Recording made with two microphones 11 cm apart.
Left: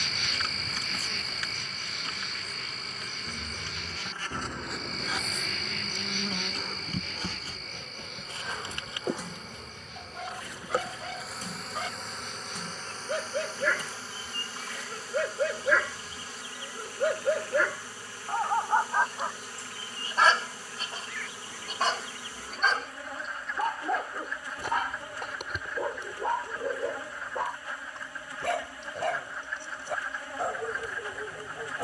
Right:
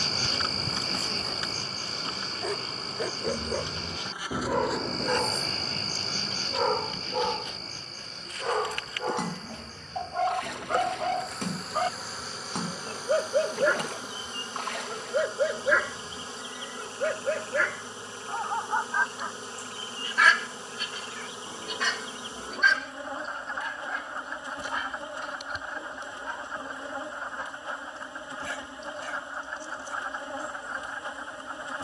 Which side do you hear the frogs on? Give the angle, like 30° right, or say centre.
30° right.